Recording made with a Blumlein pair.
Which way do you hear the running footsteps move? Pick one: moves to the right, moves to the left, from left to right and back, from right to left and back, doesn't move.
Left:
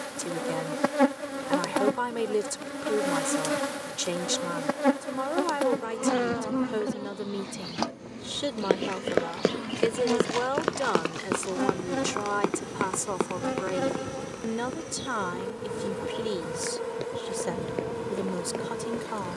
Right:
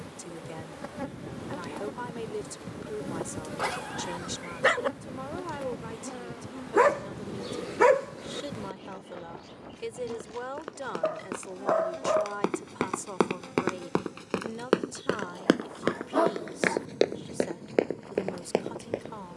moves to the right.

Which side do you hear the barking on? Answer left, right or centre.
right.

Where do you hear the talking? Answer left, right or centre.
left.